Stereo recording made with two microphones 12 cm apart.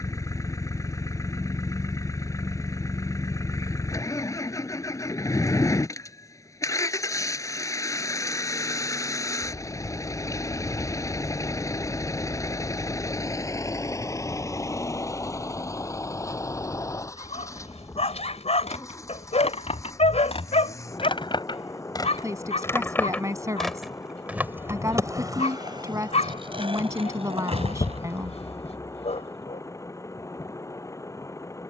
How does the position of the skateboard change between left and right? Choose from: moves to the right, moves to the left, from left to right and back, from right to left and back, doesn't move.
moves to the right.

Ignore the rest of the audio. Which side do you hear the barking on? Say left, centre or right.
left.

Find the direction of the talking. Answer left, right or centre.
right.